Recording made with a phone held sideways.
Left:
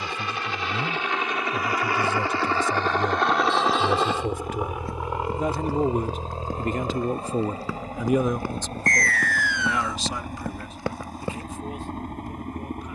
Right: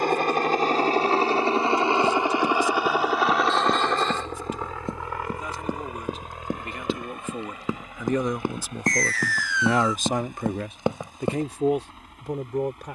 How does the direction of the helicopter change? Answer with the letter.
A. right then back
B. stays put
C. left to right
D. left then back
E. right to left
E.